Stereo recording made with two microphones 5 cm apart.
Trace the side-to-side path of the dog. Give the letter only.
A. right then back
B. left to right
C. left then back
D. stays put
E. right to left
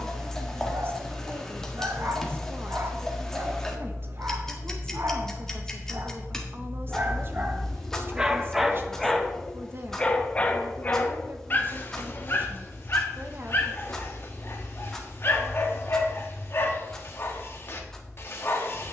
E.